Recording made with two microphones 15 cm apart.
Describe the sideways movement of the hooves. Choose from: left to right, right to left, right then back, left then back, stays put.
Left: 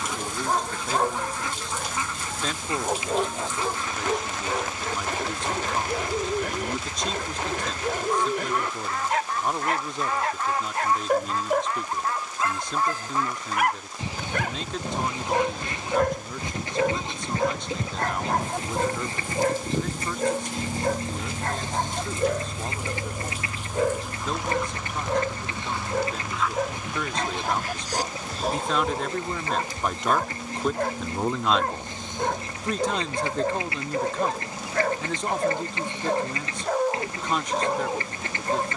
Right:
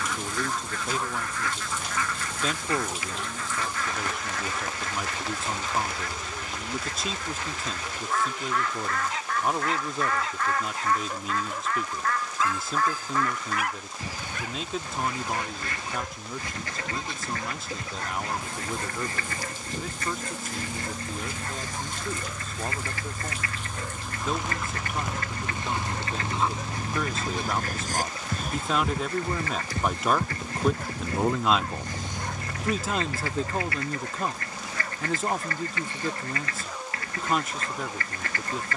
left to right.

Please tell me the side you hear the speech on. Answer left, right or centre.
centre.